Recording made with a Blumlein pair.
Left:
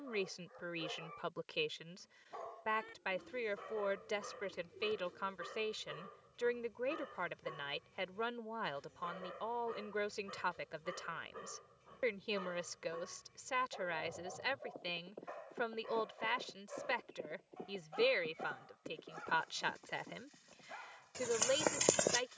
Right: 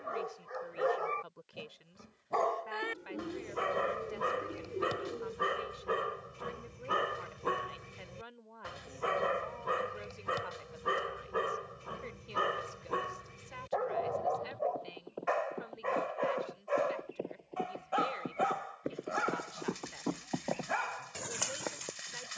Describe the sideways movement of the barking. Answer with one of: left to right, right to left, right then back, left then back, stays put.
stays put.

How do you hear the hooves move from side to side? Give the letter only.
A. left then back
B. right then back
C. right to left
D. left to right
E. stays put
C.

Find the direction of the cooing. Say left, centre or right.
right.